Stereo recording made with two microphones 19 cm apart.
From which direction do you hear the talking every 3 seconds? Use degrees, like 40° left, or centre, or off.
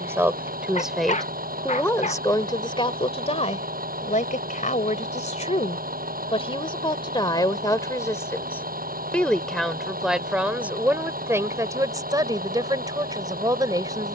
10° left, 40° left, 20° left, 10° right, 20° right.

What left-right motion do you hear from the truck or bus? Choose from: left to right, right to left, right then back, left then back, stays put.
stays put.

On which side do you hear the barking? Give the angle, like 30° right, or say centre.
40° left.